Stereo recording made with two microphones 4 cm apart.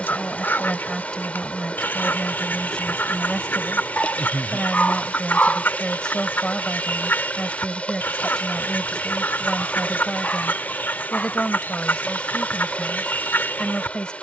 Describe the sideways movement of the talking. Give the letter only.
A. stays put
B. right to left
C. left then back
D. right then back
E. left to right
A.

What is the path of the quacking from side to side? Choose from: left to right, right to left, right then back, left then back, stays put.
stays put.